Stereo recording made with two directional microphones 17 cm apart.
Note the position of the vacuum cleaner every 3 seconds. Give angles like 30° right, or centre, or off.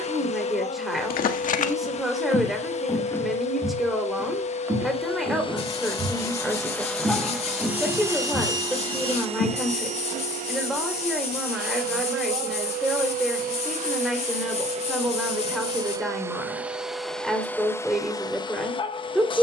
40° left, 40° left, centre, 50° right, 50° right, 10° right, 30° left.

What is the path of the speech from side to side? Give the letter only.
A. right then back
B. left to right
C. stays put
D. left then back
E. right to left
C.